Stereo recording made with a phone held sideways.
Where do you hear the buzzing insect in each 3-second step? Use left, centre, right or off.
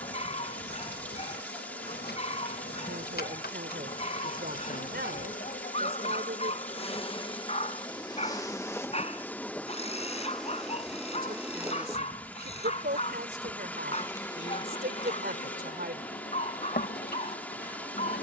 left, left, left, centre, centre, left.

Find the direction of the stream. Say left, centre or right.
centre.